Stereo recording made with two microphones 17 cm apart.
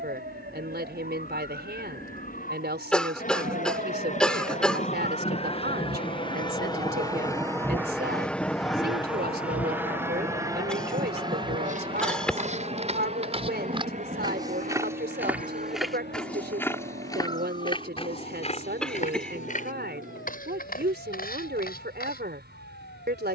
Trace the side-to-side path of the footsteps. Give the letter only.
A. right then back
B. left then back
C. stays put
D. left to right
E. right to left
E.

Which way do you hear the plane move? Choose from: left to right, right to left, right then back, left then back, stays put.
left to right.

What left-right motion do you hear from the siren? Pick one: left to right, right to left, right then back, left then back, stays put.
right to left.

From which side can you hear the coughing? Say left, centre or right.
centre.